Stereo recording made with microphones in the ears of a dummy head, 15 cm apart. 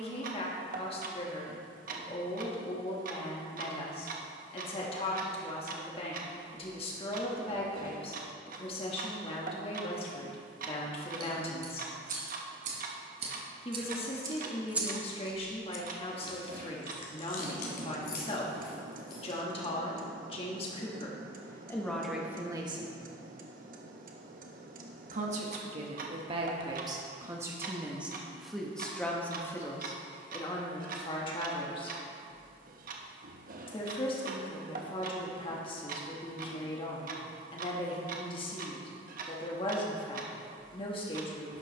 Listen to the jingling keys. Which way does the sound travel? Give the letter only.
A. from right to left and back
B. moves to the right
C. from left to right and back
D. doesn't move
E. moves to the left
E.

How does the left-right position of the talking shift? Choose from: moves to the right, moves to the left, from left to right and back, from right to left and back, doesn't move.
from left to right and back.